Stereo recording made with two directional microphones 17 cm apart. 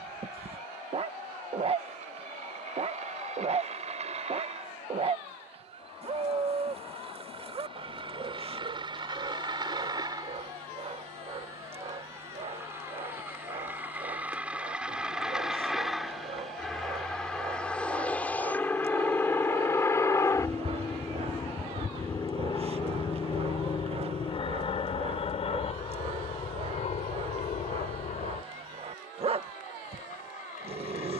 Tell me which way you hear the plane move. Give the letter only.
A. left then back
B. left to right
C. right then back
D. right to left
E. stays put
D.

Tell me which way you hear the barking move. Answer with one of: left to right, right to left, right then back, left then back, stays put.
stays put.